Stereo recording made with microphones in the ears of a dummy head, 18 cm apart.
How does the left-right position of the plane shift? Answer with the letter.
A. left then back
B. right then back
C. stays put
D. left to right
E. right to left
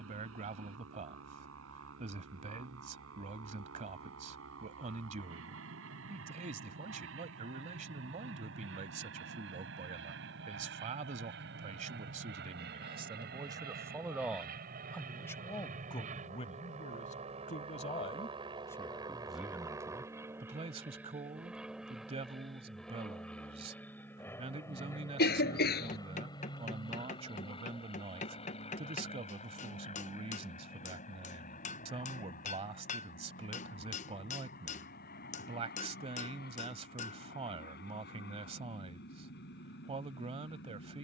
E.